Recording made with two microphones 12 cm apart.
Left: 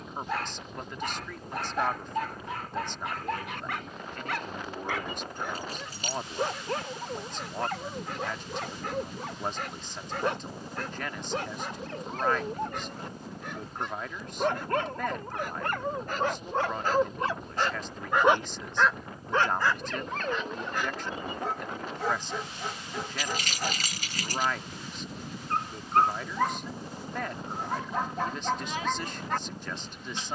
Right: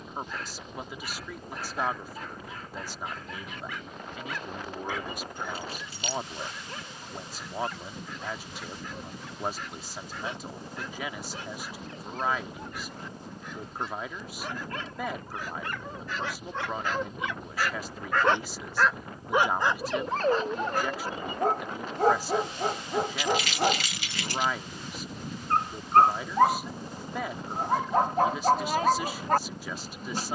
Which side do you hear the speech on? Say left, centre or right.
centre.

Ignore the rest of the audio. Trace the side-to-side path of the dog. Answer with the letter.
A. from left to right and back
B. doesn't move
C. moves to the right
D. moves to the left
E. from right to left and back
C.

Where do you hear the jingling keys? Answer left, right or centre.
left.